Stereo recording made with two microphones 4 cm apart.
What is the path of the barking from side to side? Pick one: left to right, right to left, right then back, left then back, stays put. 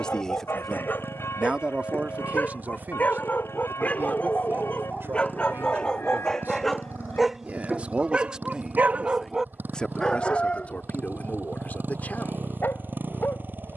right then back.